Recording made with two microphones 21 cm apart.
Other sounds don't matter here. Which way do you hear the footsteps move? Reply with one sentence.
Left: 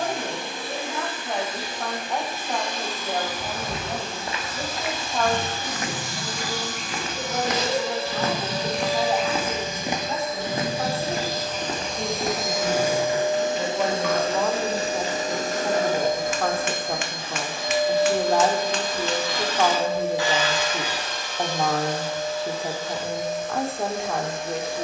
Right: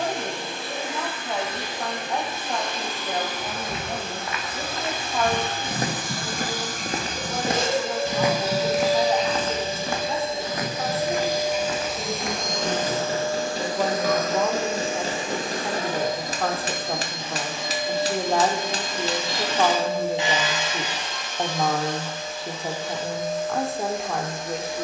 You can hear the footsteps move from left to right and back again.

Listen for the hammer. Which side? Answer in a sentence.
You can hear the hammer on the right.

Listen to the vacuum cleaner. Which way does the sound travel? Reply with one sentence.
You can hear the vacuum cleaner move to the left.